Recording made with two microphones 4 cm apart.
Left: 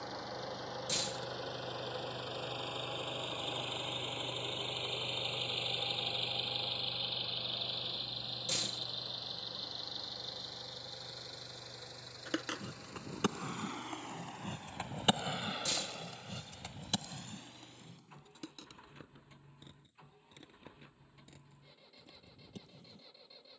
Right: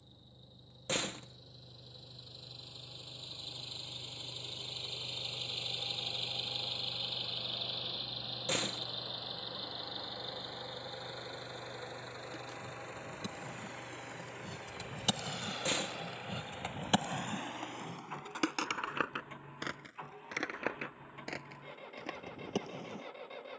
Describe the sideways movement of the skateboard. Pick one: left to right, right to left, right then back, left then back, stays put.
left to right.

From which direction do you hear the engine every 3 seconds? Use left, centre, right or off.
left, left, centre, right, right, right, right, right.